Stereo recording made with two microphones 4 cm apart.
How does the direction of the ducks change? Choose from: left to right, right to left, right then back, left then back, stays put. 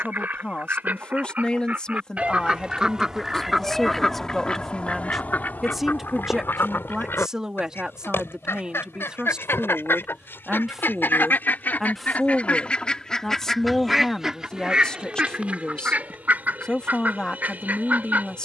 left then back.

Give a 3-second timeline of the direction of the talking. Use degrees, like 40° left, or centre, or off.
20° left, 10° left, 10° right, 10° right, 10° left, 20° left.